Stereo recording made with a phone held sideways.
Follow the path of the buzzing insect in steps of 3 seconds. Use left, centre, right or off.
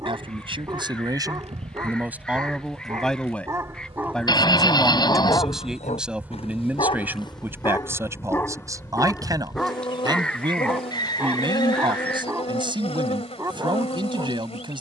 right, right, centre, left, left.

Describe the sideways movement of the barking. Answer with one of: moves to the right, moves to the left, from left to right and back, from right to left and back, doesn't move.
from right to left and back.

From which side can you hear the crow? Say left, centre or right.
centre.